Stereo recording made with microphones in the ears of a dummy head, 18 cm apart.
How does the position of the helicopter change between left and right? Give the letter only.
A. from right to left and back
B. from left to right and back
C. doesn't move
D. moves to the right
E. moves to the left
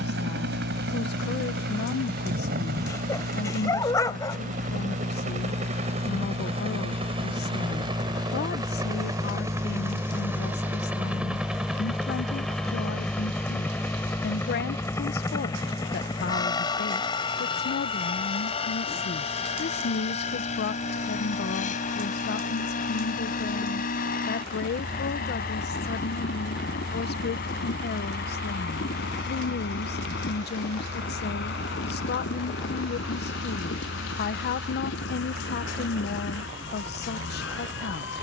E.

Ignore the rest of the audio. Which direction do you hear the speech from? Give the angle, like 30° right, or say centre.
50° left.